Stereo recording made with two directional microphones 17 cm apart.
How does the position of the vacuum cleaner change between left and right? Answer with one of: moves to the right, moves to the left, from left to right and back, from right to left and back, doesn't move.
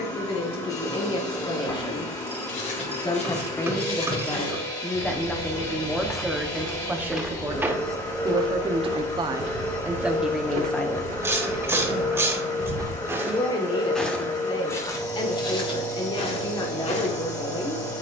doesn't move.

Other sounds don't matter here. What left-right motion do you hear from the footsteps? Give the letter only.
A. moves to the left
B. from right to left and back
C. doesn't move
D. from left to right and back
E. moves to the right
D.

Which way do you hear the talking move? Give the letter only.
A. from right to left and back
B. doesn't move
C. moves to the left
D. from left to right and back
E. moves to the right
D.